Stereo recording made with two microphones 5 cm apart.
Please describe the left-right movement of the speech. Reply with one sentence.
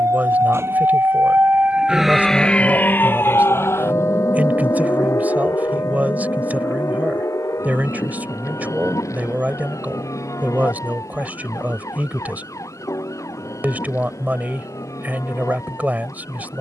You can hear the speech stay in one place.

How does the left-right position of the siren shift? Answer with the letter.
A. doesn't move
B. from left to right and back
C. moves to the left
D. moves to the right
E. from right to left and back
C.